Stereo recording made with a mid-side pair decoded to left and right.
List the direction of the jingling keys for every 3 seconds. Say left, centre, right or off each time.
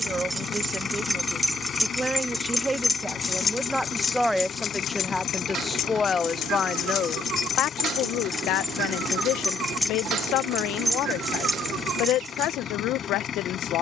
centre, left, left, centre, right.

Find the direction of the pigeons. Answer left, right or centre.
right.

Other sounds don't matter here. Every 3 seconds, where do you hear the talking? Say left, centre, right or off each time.
right, centre, left, left, left.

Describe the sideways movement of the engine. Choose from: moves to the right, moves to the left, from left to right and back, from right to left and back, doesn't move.
doesn't move.